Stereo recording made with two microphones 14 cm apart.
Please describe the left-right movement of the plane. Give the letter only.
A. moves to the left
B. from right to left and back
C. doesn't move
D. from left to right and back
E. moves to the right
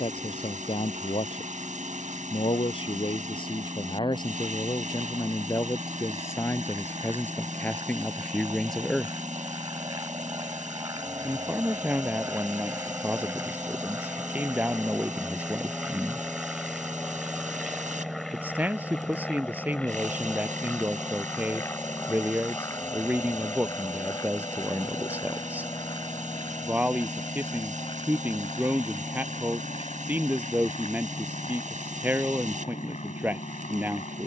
A.